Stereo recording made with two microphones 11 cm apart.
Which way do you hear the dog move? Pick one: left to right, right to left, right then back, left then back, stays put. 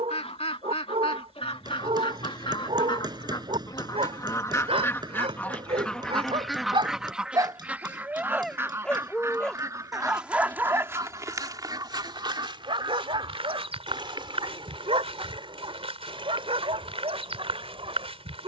left then back.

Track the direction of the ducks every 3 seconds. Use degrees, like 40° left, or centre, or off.
60° left, 30° left, 10° right, 30° right, 50° right, 50° right.